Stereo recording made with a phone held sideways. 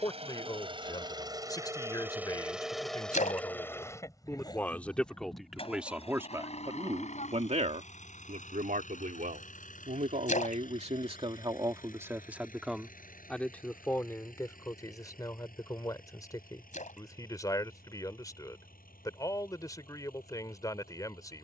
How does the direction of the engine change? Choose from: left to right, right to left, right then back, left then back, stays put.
right to left.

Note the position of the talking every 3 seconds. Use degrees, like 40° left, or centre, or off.
30° left, 10° left, 40° right, 50° right, 10° left, 20° left, 20° left.